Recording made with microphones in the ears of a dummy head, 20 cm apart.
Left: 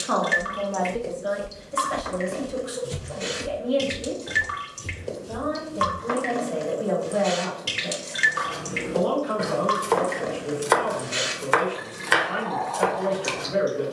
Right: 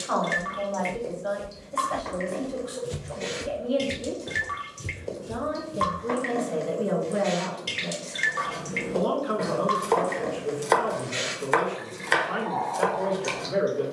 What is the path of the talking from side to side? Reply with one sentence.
You can hear the talking travel towards the right.